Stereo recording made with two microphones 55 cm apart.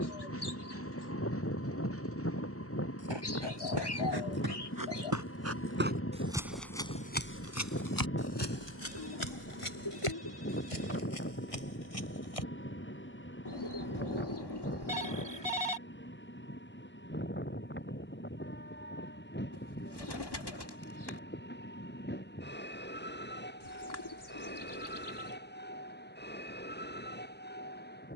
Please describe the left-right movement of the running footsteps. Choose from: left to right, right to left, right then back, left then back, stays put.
right to left.